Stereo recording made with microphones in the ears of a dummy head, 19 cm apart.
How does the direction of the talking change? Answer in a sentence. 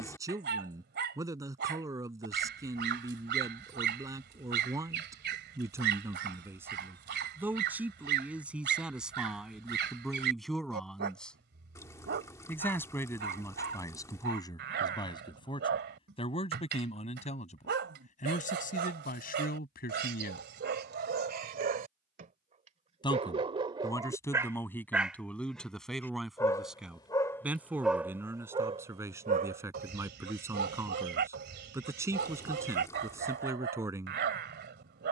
You can hear the talking move from right to left and back again.